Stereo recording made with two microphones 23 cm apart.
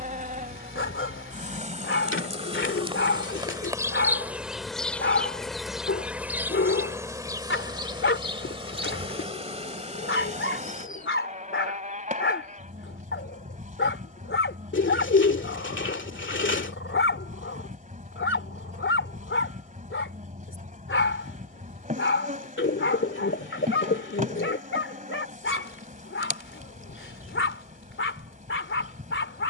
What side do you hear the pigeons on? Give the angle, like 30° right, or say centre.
60° left.